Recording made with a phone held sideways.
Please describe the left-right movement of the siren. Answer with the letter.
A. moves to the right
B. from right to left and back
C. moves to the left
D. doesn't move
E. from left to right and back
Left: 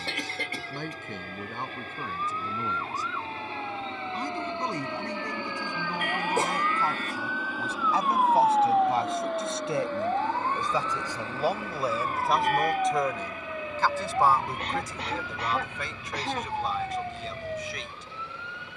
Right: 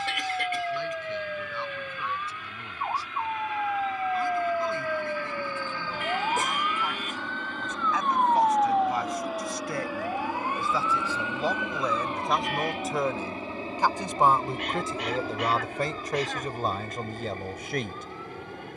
C.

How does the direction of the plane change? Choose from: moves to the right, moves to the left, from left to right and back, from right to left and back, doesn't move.
moves to the right.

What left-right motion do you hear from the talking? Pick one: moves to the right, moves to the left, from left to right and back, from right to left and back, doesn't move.
moves to the right.